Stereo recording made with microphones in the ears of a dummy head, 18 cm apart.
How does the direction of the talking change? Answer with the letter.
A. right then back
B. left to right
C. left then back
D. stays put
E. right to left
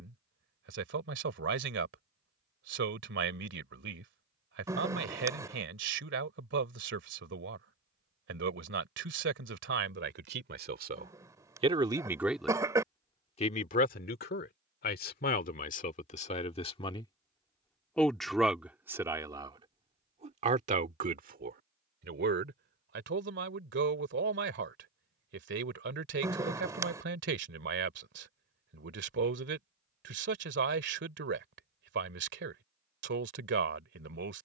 C.